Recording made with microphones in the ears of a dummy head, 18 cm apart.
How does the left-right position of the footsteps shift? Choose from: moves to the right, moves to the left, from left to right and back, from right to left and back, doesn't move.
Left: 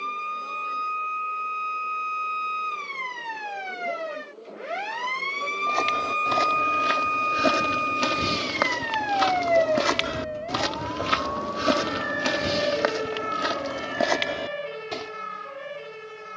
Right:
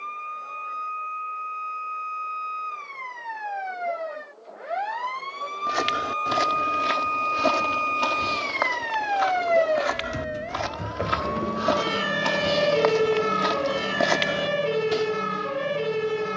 from right to left and back.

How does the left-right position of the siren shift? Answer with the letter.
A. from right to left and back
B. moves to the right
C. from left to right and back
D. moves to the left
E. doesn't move
B.